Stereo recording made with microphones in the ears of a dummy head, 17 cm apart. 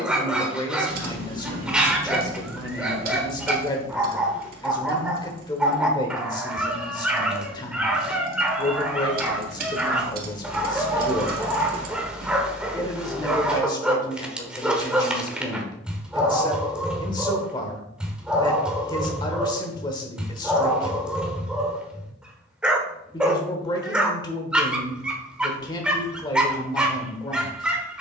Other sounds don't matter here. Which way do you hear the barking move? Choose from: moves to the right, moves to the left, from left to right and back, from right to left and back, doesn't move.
doesn't move.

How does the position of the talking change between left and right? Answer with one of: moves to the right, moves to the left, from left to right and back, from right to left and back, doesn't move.
doesn't move.